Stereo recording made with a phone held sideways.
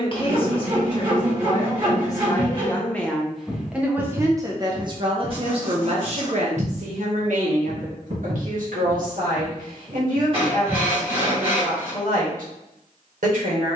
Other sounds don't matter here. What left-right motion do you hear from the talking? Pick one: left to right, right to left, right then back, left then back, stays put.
left to right.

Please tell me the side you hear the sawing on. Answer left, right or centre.
right.